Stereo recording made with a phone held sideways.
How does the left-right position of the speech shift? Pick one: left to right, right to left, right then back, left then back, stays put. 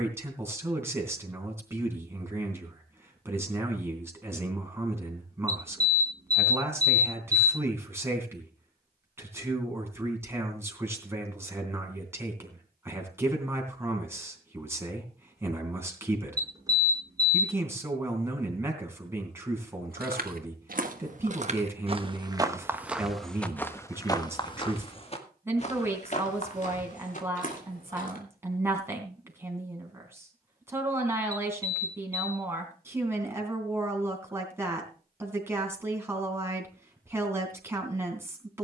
stays put.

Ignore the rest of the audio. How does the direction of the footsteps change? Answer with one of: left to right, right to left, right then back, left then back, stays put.
right to left.